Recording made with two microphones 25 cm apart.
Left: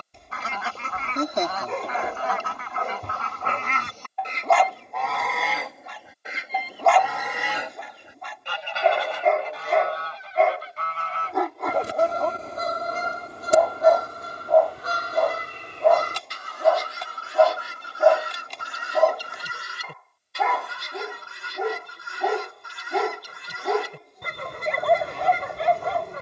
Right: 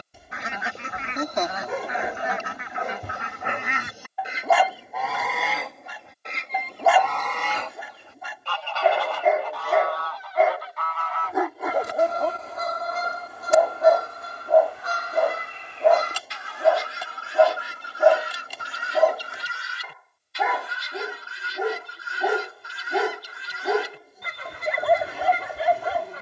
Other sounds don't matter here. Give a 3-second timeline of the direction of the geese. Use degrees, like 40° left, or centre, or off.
20° right, 10° right, 10° left, 30° left, 40° left, 50° left, 50° left, 50° left, 50° left.